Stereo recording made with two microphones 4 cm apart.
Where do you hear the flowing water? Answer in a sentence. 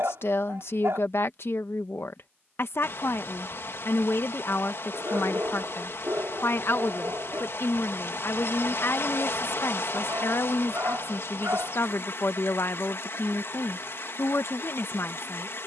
You can hear the flowing water on the left.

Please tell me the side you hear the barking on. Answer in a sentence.
In this clip you hear the barking on the right.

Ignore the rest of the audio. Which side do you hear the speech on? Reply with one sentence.
You can hear the speech on the left.